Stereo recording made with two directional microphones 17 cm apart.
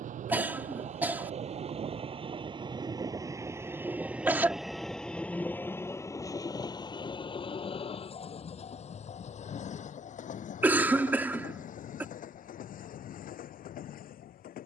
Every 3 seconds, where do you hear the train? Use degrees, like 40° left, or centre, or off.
40° right, centre, 30° left, 50° left, 60° left.